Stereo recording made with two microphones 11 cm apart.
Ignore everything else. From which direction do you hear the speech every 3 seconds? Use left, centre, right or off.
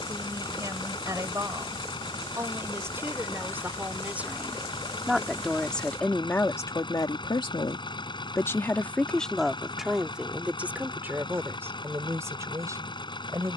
right, centre, left, centre, right.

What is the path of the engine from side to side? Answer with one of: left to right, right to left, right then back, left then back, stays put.
stays put.